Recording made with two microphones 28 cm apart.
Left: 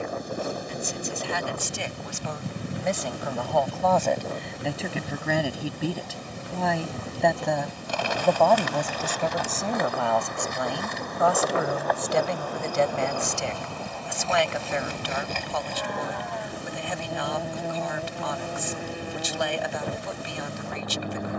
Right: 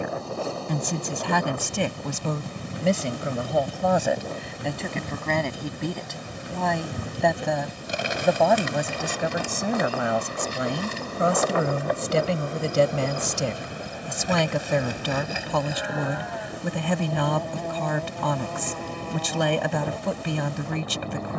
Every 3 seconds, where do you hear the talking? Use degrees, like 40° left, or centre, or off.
60° right, 10° right, centre, 20° right, 40° right, 60° right, 60° right.